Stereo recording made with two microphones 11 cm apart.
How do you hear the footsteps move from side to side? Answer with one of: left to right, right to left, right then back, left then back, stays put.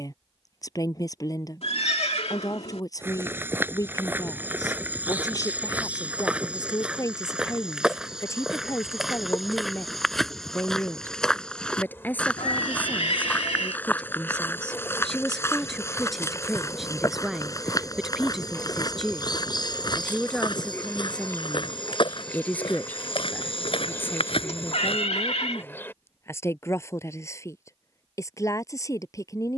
right to left.